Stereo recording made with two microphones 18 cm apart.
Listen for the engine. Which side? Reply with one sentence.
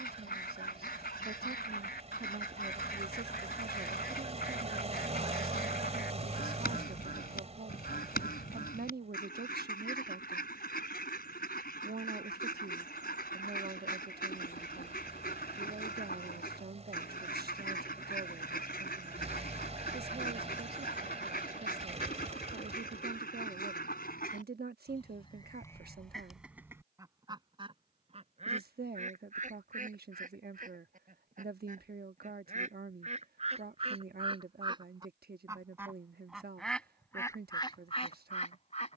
In this clip you hear the engine on the right.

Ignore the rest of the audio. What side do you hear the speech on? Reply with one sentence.
In this clip you hear the speech on the right.